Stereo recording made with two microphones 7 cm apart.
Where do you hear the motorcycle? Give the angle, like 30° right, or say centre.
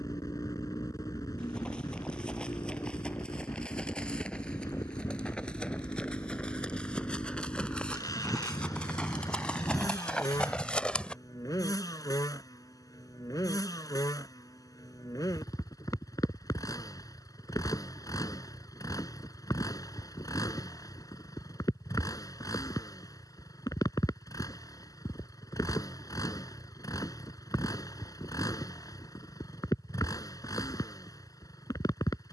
60° left.